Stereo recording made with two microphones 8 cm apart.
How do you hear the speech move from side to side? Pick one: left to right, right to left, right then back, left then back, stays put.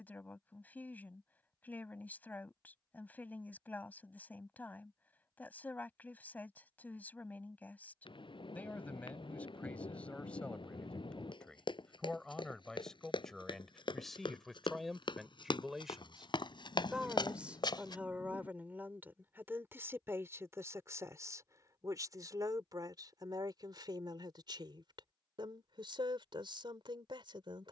left to right.